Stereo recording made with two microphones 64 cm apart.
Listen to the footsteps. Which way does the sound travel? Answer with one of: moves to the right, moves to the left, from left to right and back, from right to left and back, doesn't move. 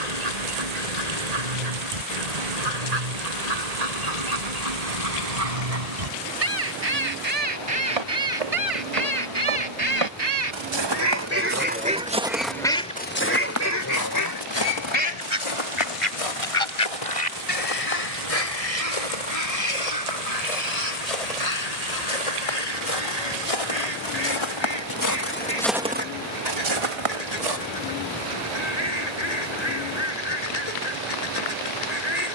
from right to left and back.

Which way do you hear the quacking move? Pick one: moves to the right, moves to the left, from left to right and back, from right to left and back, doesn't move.
moves to the left.